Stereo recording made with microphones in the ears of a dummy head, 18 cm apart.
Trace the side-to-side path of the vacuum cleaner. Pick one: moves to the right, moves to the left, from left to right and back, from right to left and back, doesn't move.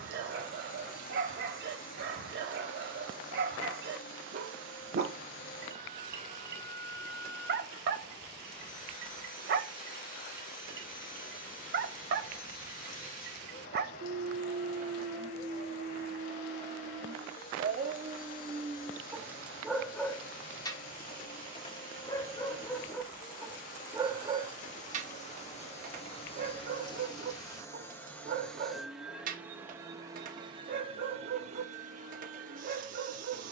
moves to the right.